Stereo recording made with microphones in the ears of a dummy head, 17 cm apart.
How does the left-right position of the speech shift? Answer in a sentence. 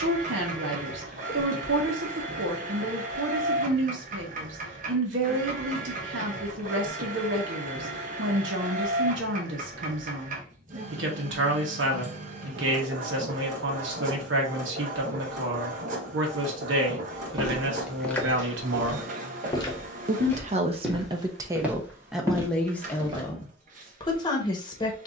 In this clip you hear the speech go from the right side to the left.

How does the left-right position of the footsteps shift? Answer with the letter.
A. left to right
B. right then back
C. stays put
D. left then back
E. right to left
D.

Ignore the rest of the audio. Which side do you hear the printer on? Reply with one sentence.
In this clip you hear the printer on the right.